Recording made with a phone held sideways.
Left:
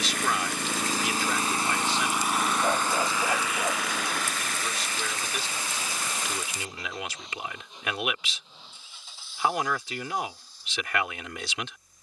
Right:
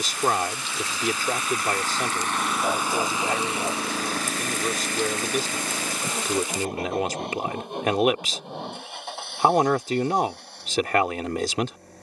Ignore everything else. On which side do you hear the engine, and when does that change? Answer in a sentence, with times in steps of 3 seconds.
You can hear the engine on the left from 0 s and on the right from 3 s.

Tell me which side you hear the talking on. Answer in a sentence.
In this clip you hear the talking on the right.